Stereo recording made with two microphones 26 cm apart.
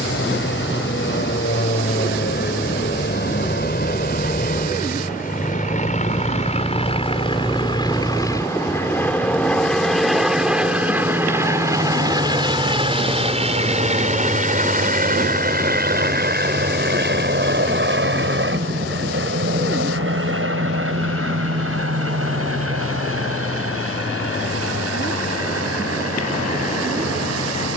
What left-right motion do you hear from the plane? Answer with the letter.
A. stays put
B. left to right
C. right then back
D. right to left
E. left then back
B.